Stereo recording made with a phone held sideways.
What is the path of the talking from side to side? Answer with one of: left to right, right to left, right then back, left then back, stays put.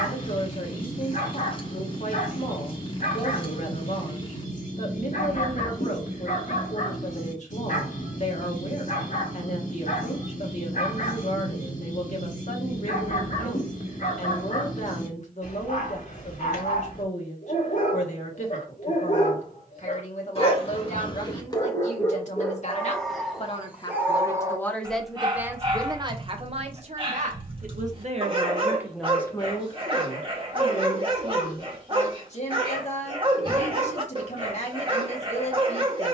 right then back.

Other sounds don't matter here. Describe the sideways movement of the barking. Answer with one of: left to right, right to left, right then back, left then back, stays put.
left to right.